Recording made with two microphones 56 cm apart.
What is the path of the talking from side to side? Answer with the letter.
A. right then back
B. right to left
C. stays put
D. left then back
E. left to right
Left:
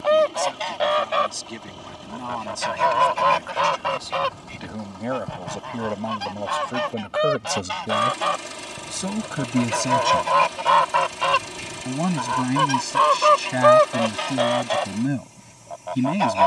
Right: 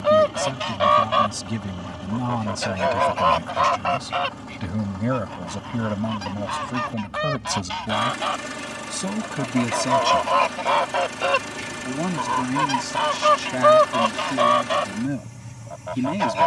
B.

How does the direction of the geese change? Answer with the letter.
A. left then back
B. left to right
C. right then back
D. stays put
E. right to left
A.